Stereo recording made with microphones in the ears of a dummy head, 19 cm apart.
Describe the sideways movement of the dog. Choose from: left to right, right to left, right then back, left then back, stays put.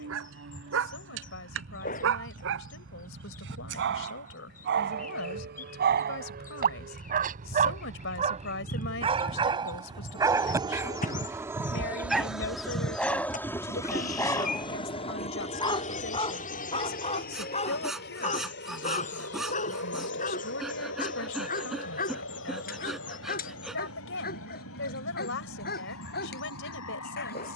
right to left.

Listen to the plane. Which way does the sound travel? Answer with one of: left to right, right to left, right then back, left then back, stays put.
right to left.